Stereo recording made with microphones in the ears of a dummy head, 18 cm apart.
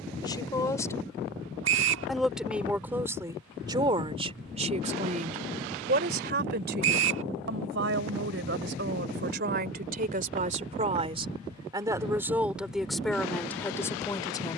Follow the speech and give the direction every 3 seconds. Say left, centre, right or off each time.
centre, right, right, right, centre.